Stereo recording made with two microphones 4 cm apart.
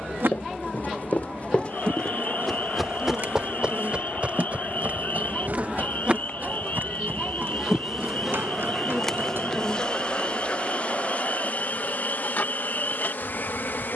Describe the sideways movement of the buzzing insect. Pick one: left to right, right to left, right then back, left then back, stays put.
right to left.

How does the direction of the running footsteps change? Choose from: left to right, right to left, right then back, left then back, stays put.
left to right.